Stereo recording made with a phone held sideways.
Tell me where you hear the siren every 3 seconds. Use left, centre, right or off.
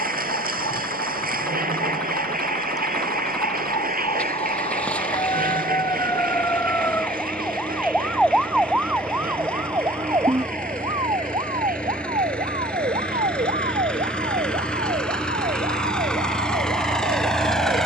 left, left, centre, right, right, right.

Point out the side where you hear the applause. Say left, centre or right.
right.